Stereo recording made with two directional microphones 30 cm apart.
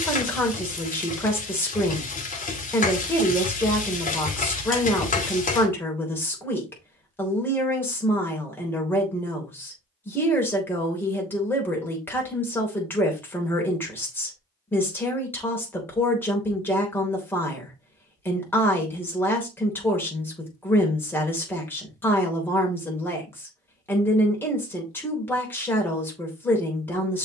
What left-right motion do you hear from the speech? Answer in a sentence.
In this clip you hear the speech stay put.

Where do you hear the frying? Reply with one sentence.
In this clip you hear the frying on the left.